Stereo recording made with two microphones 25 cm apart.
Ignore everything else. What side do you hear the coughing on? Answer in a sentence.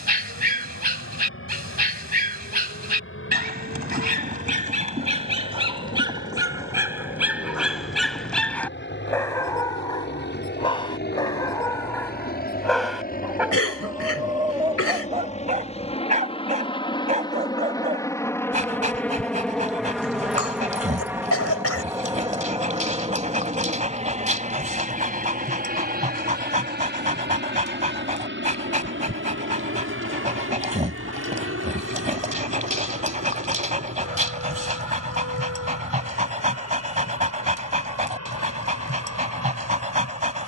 In this clip you hear the coughing on the left.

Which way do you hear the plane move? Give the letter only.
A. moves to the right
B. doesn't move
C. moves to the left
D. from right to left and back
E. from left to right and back
A.